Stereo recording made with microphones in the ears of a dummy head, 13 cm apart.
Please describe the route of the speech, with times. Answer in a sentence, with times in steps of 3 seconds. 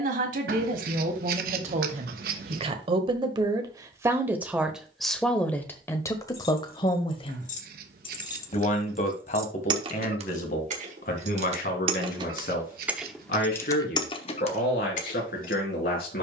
In this clip you hear the speech on the right from 0 s, in the centre from 3 s and on the left from 6 s.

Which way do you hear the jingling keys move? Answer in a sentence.
In this clip you hear the jingling keys move from left to right and back again.